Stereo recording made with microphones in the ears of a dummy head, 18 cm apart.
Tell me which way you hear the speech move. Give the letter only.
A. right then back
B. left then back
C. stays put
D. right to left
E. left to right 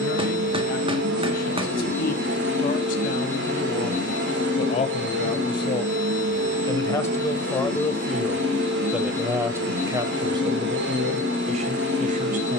E.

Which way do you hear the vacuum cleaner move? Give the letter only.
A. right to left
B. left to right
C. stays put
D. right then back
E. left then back
C.